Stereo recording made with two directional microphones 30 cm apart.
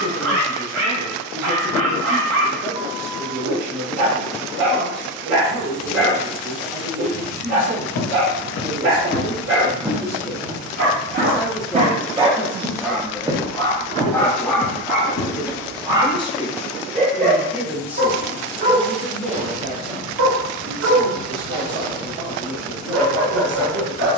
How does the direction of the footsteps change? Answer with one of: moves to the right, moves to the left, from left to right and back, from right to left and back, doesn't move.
from left to right and back.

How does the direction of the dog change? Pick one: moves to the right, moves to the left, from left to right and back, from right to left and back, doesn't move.
from right to left and back.